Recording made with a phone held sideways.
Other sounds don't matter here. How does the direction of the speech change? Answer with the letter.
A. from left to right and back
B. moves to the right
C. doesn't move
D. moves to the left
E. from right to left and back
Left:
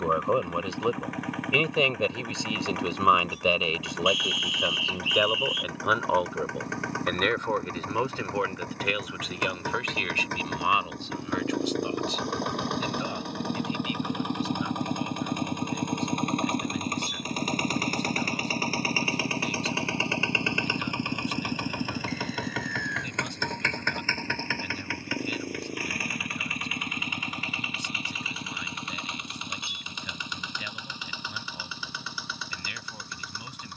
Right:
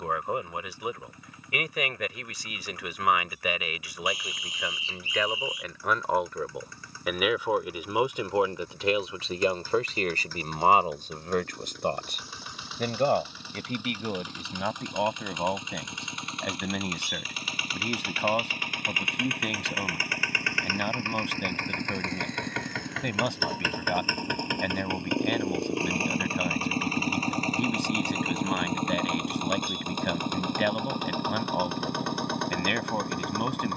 B.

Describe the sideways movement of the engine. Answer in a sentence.
In this clip you hear the engine move to the right.